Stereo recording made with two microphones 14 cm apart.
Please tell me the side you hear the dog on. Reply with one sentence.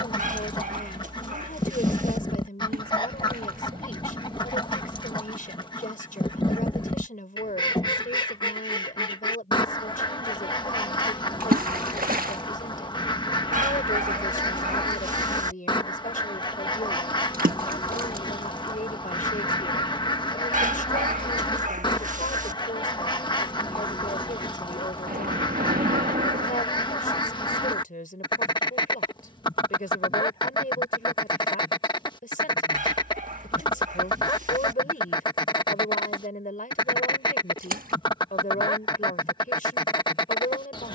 In this clip you hear the dog on the right.